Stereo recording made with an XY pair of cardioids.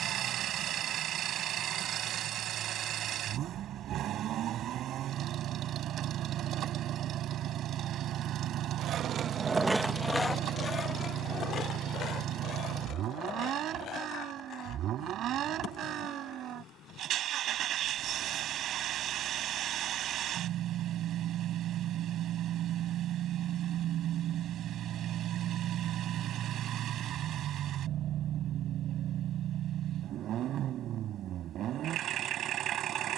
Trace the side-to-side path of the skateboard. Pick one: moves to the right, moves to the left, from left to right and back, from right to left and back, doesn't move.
moves to the left.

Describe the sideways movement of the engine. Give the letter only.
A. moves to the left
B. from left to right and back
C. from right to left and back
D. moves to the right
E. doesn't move
E.